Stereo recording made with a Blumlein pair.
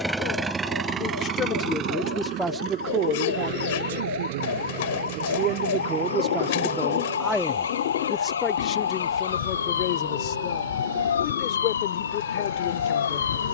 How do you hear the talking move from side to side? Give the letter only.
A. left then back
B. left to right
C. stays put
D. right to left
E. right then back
E.